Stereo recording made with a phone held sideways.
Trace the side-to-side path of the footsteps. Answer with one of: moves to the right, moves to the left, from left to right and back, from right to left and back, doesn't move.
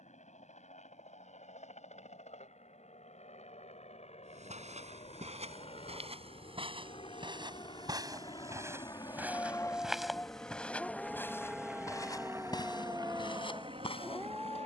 moves to the left.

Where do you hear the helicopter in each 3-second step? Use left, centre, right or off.
left, left, left, centre, right.